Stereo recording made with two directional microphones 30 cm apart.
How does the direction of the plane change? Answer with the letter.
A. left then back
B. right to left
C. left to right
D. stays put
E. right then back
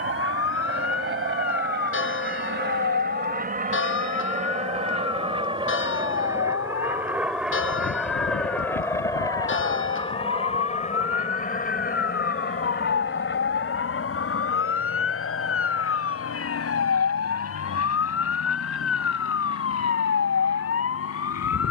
B.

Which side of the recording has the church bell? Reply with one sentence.
In this clip you hear the church bell on the left.